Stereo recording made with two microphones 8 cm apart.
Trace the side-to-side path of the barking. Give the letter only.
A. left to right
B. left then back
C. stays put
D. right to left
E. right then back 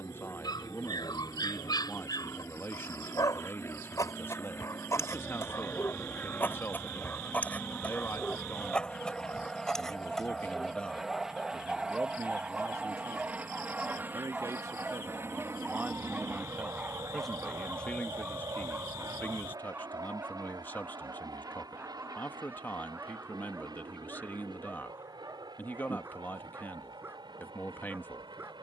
A.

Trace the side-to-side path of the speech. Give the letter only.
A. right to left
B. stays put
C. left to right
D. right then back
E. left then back
D.